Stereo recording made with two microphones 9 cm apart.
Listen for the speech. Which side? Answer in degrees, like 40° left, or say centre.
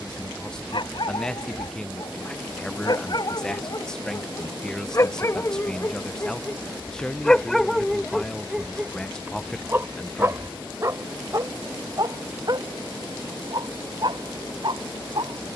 10° left.